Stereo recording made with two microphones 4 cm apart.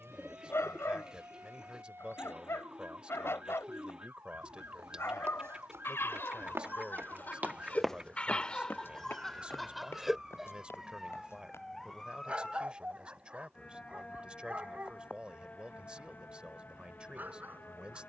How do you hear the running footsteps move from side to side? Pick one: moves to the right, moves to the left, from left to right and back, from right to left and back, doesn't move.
moves to the left.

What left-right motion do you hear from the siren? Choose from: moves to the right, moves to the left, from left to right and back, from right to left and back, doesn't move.
moves to the left.